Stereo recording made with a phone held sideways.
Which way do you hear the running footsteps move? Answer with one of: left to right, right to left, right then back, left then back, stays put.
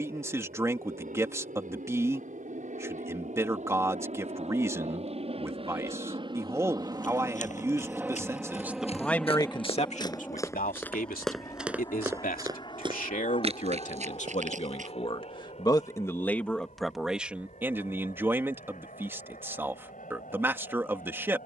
left to right.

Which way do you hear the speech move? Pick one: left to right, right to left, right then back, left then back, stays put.
left then back.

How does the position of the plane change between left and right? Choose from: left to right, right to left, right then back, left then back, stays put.
right to left.